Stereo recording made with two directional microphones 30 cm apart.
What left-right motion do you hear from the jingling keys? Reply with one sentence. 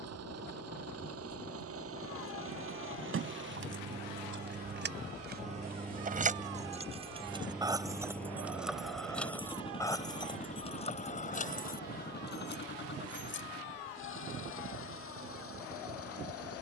In this clip you hear the jingling keys move from right to left.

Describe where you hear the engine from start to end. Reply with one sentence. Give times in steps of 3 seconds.
In this clip you hear the engine on the right from 0 s, in the centre from 6 s and on the left from 9 s.